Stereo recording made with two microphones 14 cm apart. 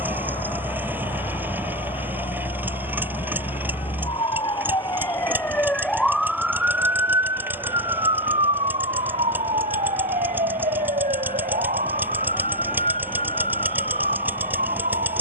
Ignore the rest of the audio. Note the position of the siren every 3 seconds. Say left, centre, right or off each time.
left, left, right, right, right.